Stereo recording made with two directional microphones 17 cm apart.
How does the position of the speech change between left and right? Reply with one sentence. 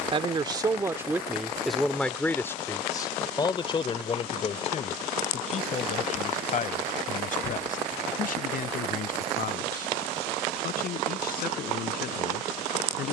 In this clip you hear the speech move from right to left.